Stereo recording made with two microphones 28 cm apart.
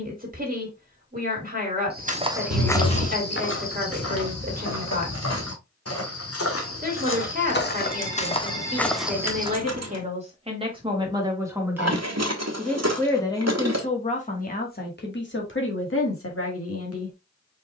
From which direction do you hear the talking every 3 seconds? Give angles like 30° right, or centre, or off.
30° right, 30° right, 30° right, 20° right, 20° left, 50° left.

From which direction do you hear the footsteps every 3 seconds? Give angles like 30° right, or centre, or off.
10° right, 60° left, 40° left, 10° right, off, off.